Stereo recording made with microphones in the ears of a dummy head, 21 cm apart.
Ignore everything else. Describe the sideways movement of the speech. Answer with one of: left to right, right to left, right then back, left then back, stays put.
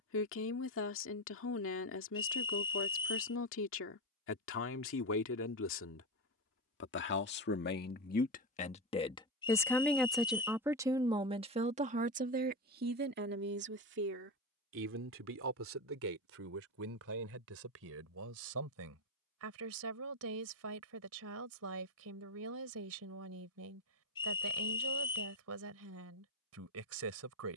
left to right.